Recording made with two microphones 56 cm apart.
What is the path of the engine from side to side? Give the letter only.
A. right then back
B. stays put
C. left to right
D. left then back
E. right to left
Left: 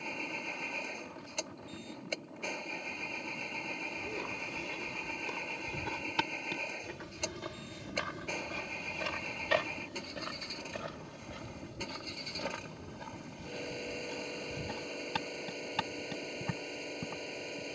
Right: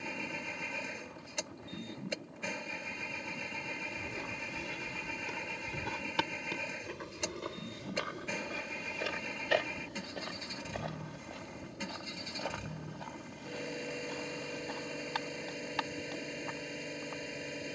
B.